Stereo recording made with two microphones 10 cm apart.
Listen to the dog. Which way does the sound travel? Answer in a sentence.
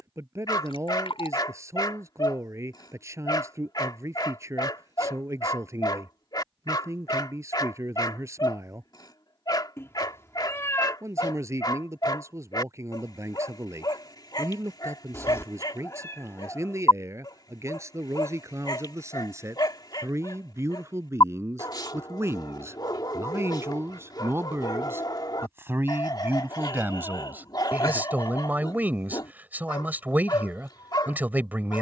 You can hear the dog stay put.